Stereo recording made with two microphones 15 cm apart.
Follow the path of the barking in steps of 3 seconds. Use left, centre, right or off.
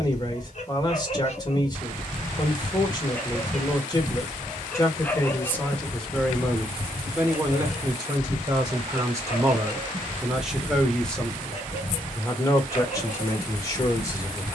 left, centre, left, left, left.